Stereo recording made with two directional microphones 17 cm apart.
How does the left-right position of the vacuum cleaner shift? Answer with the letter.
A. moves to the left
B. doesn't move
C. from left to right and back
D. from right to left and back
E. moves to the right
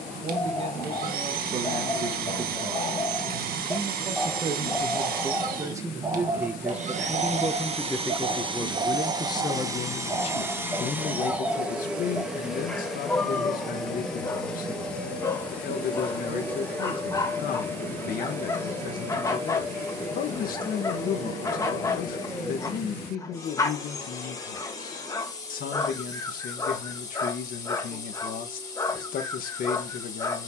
A.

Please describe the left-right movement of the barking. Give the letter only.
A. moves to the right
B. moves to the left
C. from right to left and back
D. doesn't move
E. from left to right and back
E.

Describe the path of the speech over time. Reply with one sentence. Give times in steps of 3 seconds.
You can hear the speech on the right from 0 s, in the centre from 6 s and on the left from 9 s.